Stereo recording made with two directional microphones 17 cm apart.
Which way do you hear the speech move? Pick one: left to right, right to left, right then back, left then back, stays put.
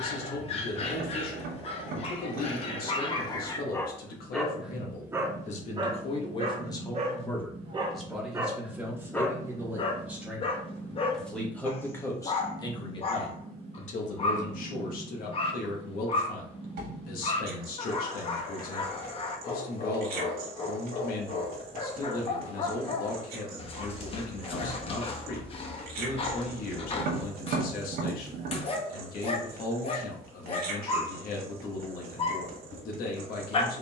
right then back.